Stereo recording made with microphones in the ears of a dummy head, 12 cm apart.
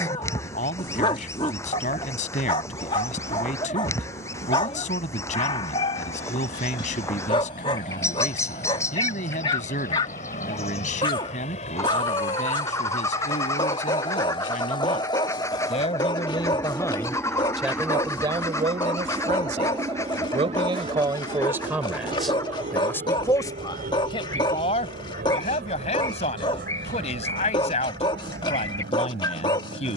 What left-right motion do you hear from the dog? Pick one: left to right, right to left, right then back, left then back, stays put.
stays put.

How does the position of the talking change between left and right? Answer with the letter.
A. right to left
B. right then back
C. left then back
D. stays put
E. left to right
B.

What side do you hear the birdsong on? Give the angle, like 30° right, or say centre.
20° left.